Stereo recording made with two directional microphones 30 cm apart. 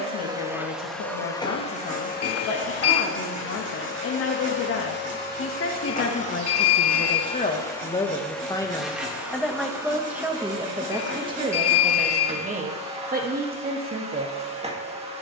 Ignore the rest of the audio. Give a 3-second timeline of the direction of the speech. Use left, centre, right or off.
left, left, left, centre, right.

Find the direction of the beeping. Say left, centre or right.
left.